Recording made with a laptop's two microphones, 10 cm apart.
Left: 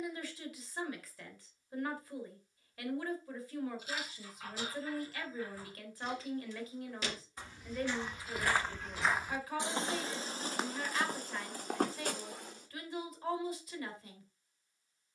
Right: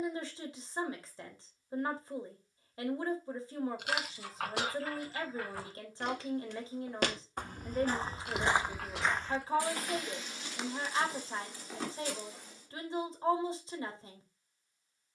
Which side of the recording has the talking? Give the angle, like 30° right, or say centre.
30° right.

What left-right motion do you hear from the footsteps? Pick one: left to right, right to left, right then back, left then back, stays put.
right to left.